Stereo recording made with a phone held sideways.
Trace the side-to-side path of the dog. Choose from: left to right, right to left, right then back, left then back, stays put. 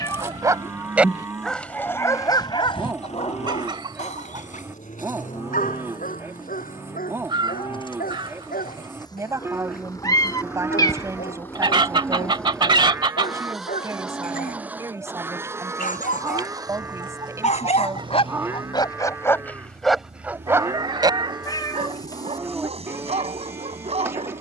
left then back.